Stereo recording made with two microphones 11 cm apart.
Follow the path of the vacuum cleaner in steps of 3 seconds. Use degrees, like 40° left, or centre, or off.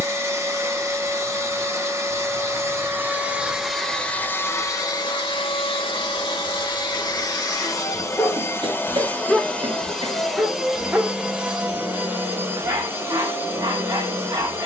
20° right, 20° left, 40° left, centre, 20° right.